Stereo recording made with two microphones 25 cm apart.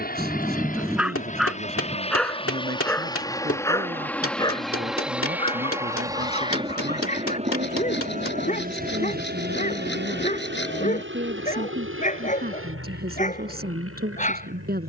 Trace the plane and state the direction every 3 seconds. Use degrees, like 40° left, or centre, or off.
30° left, centre, 30° right, 40° right, 60° right.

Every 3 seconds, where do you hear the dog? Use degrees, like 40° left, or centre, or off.
centre, 20° left, 30° left, 30° left, 30° left.